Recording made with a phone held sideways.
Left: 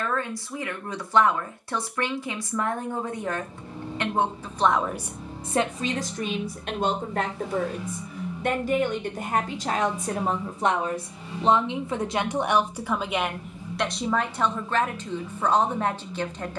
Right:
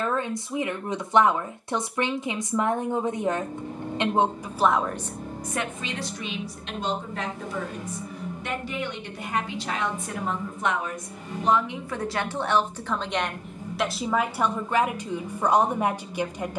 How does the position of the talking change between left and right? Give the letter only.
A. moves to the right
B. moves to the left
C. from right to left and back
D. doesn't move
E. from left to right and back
C.